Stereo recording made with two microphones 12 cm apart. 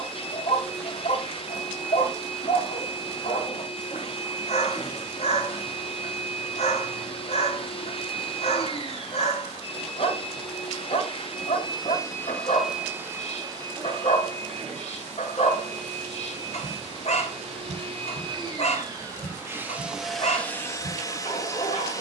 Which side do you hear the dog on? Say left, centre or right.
left.